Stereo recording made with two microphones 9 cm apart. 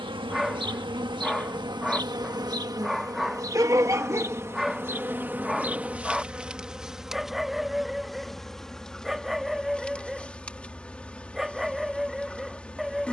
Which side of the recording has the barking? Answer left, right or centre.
centre.